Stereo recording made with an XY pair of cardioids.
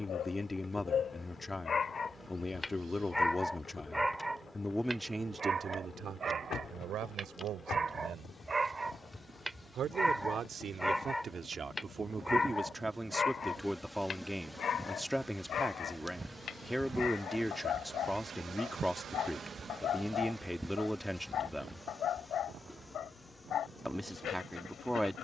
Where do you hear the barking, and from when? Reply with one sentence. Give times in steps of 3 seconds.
In this clip you hear the barking on the left from 0 s, in the centre from 3 s, on the right from 6 s, in the centre from 9 s and on the left from 12 s.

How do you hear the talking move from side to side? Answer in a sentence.
In this clip you hear the talking go right and come back.